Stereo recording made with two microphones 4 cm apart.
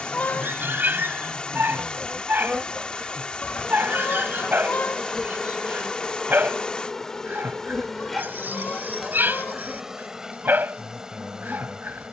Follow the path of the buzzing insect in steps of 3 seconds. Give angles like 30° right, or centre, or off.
10° right, centre, 10° left, 10° right.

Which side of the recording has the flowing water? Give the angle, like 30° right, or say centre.
20° left.